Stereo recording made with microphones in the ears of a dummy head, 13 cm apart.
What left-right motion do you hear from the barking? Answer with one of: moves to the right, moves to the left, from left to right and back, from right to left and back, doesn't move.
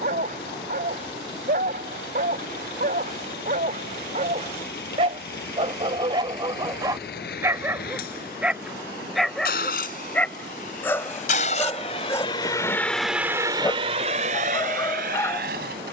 moves to the left.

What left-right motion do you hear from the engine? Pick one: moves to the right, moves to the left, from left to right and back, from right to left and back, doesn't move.
moves to the right.